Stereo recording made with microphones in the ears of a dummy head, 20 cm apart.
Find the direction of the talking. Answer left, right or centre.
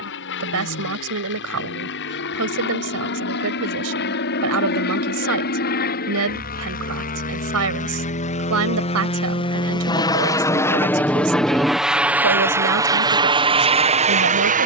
right.